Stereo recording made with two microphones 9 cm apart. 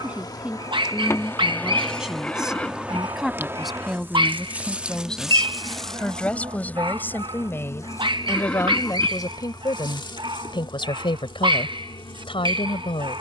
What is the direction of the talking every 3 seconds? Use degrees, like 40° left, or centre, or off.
10° right, centre, 20° left, 60° left, 70° left.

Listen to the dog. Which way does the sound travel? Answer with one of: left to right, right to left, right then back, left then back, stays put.
stays put.